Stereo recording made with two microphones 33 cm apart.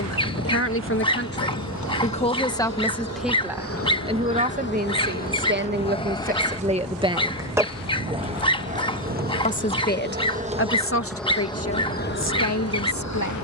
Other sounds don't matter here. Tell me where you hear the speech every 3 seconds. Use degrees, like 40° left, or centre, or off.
30° left, 20° right, 20° right, 40° left, 60° left.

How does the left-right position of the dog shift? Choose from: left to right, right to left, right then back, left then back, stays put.
stays put.